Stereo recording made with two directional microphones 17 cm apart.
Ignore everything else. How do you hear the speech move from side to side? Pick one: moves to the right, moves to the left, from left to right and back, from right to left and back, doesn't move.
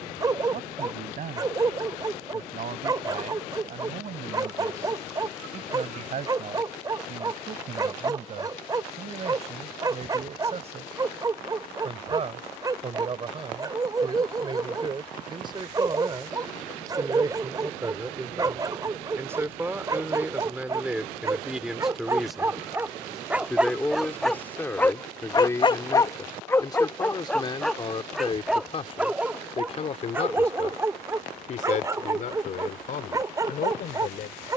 moves to the left.